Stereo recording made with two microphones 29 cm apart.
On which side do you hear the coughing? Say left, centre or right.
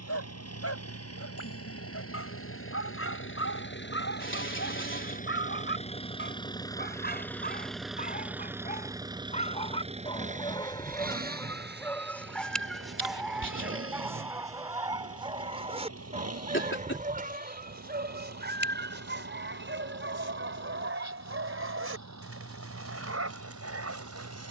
left.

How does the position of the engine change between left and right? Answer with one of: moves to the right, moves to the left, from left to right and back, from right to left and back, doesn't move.
moves to the right.